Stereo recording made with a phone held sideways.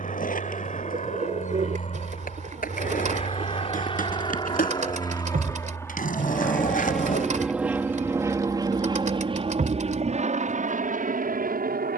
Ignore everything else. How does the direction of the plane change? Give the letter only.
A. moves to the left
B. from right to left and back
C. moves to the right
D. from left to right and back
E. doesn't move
C.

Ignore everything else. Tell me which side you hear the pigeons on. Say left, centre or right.
right.